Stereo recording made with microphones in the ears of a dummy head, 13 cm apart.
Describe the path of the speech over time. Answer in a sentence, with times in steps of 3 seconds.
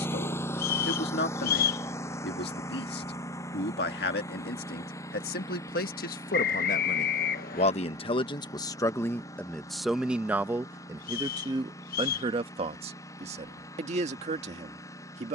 In this clip you hear the speech on the left from 0 s, in the centre from 9 s and on the right from 12 s.